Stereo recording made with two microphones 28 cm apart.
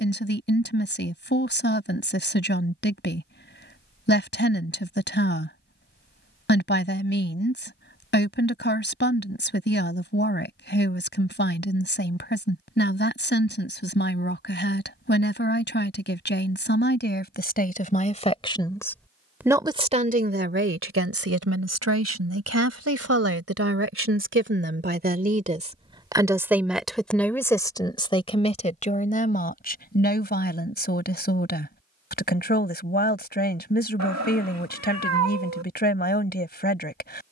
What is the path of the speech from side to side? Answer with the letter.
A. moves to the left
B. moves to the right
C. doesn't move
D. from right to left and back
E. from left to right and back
E.